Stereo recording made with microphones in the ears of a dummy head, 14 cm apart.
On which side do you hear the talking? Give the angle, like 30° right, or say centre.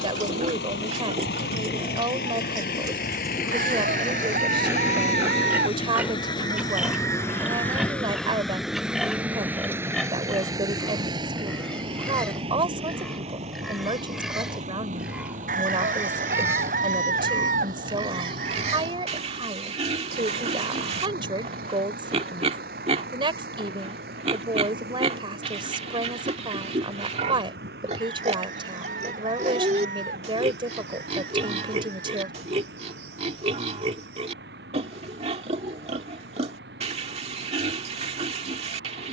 30° right.